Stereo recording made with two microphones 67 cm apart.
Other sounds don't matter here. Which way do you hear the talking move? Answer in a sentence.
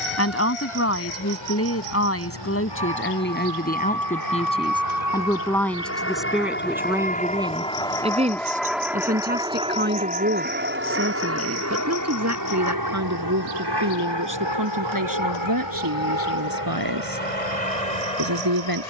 In this clip you hear the talking move to the right.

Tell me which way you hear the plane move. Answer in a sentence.
You can hear the plane go from the left side to the right.